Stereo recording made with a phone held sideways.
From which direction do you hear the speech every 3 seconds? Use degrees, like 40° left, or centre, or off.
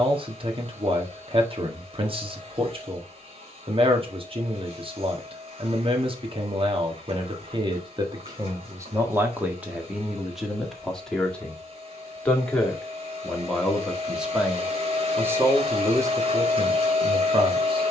40° right, 40° right, 30° right, centre, centre, 30° right.